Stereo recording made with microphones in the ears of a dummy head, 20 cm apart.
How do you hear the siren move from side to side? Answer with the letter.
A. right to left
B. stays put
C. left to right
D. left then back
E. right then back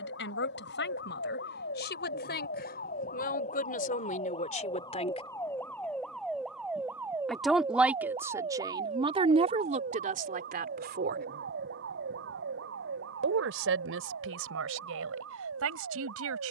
C.